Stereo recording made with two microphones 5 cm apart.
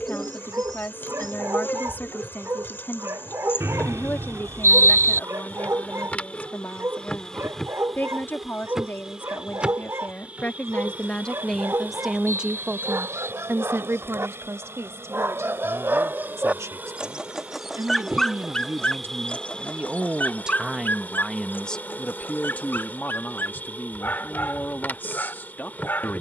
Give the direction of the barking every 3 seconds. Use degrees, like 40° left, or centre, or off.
70° right, 70° right, 70° right, 70° right, 70° right, 30° right, 30° left, 50° left, 50° left.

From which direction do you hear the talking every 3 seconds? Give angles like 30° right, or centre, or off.
40° left, 40° left, 40° left, 30° left, 40° right, 70° right, 40° right, 30° left, 40° left.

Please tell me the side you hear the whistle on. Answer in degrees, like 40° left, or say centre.
70° right.